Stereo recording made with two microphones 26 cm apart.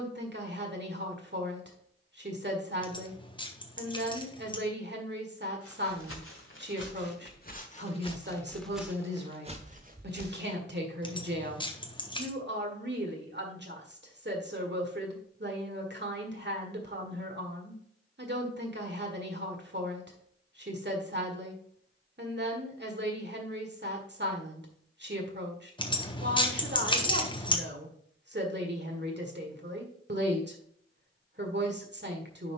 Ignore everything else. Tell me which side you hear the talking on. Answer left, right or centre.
right.